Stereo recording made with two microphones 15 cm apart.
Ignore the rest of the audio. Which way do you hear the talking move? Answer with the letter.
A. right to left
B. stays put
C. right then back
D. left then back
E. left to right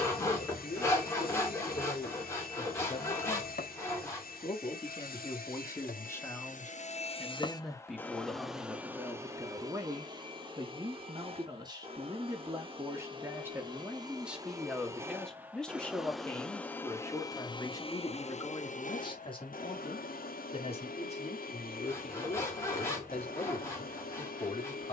C.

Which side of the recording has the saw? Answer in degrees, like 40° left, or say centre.
20° left.